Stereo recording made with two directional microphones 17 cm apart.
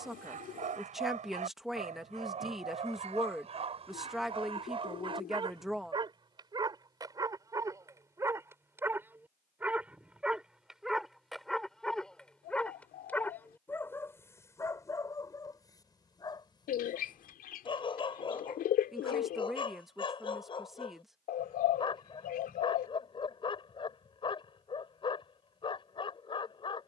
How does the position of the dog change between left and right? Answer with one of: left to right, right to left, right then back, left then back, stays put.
right to left.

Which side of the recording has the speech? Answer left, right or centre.
centre.